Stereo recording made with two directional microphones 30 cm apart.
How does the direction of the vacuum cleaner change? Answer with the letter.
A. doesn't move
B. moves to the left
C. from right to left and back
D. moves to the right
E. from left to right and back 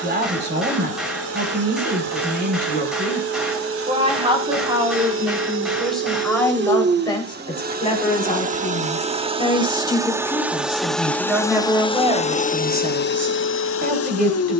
B.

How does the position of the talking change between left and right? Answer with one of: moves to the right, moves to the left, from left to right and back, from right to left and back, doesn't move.
from right to left and back.